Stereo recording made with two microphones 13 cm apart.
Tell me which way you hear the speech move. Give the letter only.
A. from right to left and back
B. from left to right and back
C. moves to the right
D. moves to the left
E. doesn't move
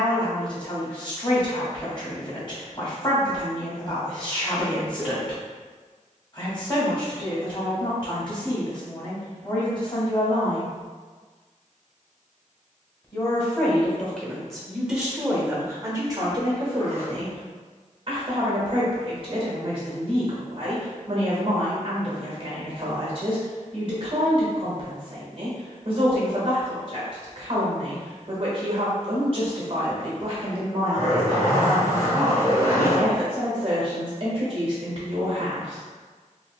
C.